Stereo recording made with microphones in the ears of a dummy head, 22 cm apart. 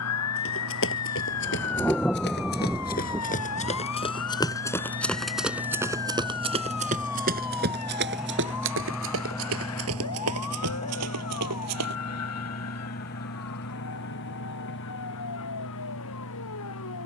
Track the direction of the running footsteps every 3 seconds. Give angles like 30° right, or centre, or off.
50° left, 10° left, 40° right, 60° right, off, off.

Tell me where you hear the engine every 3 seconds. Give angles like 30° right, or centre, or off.
50° right, 30° right, 10° right, 20° left, 50° left, 60° left.